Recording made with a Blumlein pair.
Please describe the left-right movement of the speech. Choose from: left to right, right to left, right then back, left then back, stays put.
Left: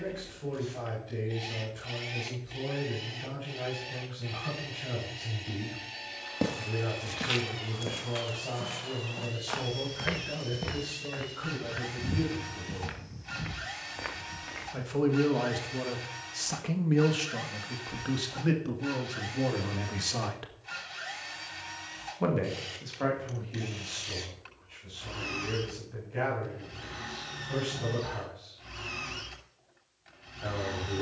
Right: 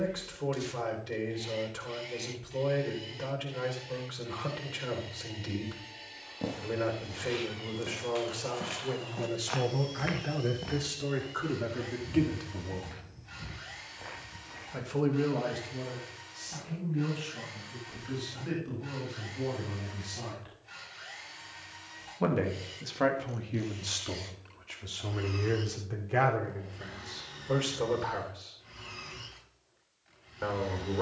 left then back.